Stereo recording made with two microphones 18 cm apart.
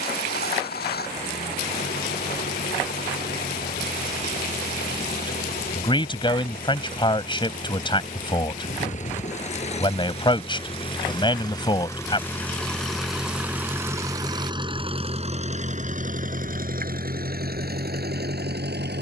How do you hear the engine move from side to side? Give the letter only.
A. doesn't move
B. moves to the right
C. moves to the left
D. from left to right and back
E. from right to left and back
B.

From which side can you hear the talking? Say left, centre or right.
left.